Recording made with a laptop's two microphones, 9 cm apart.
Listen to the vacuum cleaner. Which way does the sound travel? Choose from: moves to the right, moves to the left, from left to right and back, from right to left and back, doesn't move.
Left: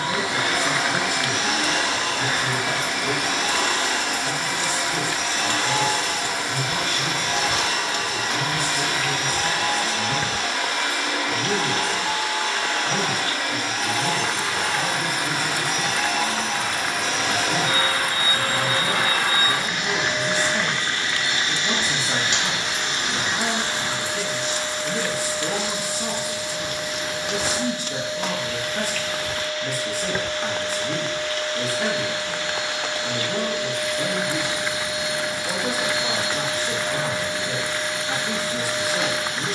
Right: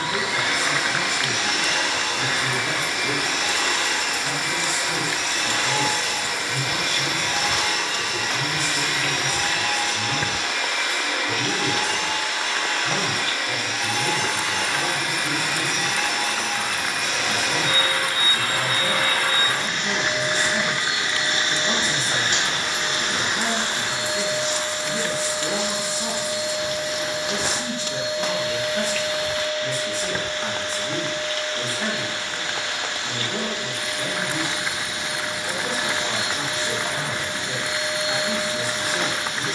moves to the right.